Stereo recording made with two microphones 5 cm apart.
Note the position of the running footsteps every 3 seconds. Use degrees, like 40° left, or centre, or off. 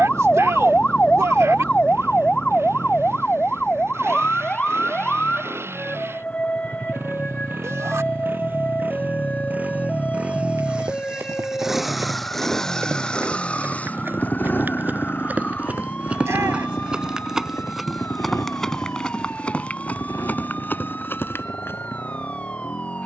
off, off, off, 60° right, 40° right, 20° right, 20° left, 50° left.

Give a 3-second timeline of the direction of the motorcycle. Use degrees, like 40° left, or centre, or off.
70° right, 60° right, 50° right, 20° right, 20° left, 50° left, 70° left, 80° left.